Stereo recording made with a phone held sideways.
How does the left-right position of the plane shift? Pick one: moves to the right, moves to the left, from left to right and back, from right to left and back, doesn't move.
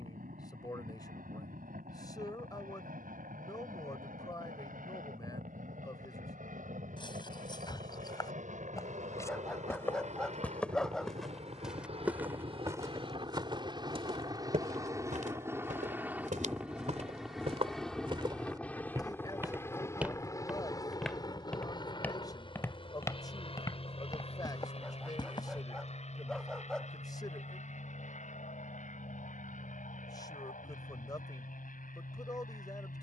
moves to the left.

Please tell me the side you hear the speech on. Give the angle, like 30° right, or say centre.
30° left.